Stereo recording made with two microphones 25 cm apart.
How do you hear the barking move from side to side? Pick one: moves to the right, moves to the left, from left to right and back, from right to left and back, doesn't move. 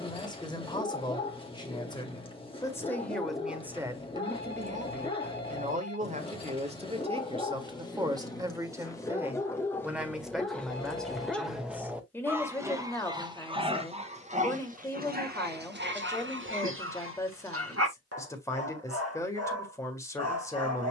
moves to the right.